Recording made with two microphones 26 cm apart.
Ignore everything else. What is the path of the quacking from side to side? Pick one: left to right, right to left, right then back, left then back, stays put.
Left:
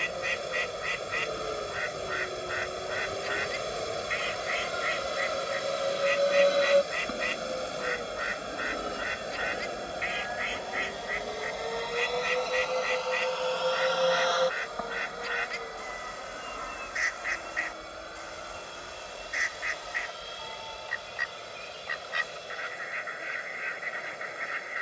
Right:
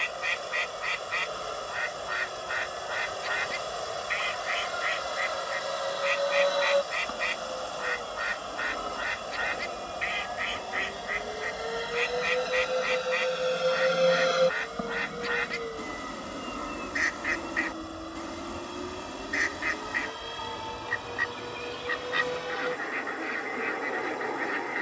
stays put.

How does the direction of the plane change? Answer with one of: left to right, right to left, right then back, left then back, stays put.
left to right.